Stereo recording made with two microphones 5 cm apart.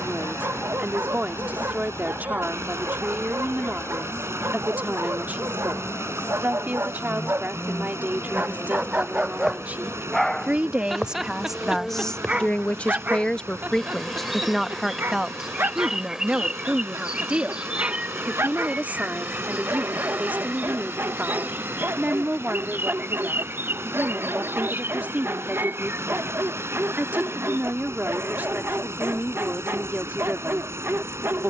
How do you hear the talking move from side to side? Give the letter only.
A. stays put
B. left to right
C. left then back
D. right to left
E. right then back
C.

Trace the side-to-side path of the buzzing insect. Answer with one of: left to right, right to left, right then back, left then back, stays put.
left to right.